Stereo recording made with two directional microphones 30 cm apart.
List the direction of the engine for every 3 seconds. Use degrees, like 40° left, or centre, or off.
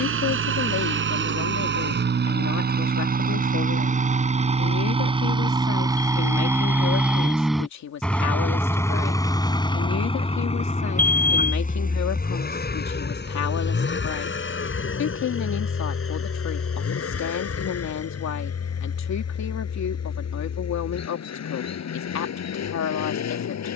40° right, 20° right, centre, 20° left, 40° left, 50° left, 50° left, 60° left.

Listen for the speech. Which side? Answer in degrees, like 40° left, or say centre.
60° left.